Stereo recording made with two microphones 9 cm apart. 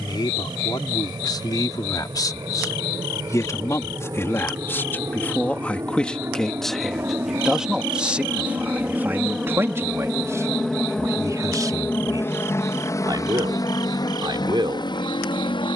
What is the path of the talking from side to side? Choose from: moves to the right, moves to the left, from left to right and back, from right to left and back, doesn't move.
moves to the right.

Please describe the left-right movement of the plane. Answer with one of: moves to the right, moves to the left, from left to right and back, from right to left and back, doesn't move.
moves to the left.